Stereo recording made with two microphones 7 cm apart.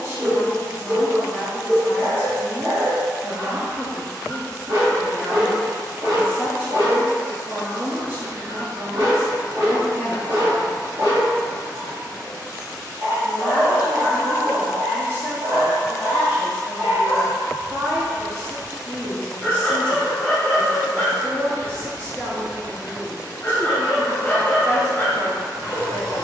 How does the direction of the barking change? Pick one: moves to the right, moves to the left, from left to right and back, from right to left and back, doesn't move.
moves to the left.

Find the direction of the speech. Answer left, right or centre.
right.